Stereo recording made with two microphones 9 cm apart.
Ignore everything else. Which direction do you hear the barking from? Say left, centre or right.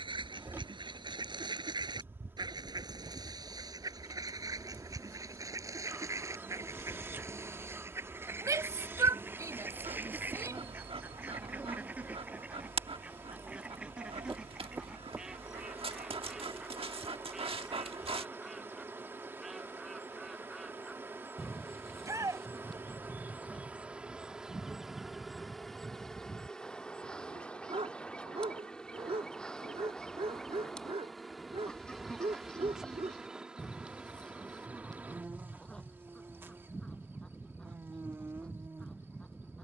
right.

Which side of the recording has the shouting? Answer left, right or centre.
right.